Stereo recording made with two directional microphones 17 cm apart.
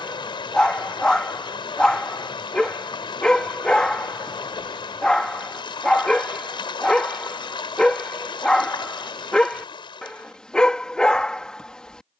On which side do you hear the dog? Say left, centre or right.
centre.